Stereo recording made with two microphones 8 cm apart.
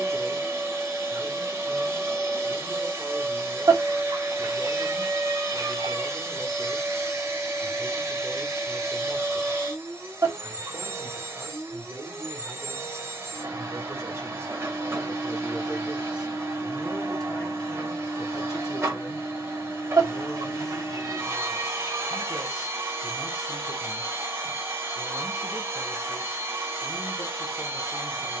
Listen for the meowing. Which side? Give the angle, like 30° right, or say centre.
50° right.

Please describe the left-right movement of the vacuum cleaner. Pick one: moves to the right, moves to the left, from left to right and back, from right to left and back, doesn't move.
doesn't move.